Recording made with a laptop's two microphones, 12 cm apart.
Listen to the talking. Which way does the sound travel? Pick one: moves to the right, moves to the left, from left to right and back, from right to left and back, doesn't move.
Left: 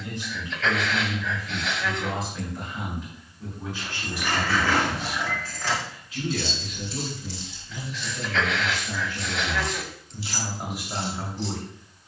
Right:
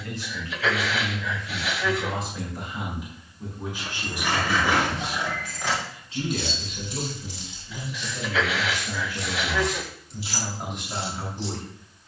from left to right and back.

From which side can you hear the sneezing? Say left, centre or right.
centre.